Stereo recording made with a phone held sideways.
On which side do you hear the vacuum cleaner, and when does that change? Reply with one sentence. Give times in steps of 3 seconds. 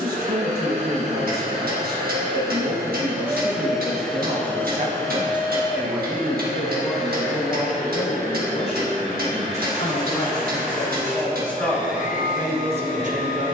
You can hear the vacuum cleaner on the right from 0 s, in the centre from 3 s and on the left from 6 s.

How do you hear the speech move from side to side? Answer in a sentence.
In this clip you hear the speech move from right to left and back again.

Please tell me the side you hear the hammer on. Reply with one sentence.
In this clip you hear the hammer on the right.